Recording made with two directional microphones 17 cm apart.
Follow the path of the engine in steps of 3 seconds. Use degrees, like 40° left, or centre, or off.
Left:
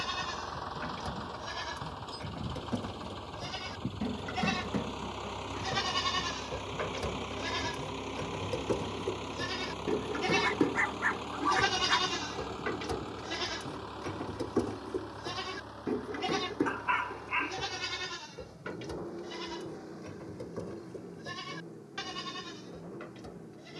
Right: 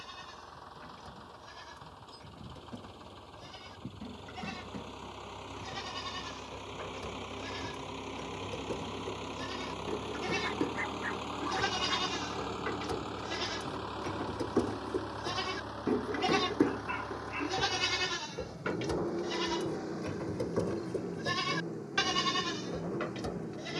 50° left, 30° left, 10° left, 10° right, 20° right, 40° right, 40° right, 50° right.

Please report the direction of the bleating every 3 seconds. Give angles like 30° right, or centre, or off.
60° left, 50° left, 40° left, 30° left, centre, 30° right, 50° right, 60° right.